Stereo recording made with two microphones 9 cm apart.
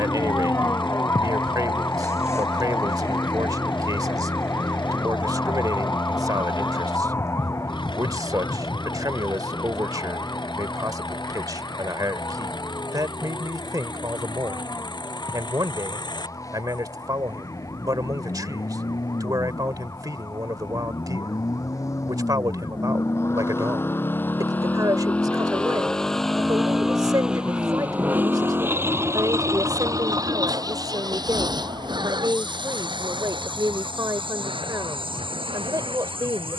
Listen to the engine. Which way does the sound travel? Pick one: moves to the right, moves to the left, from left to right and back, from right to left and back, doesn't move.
moves to the right.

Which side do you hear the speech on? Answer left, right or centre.
right.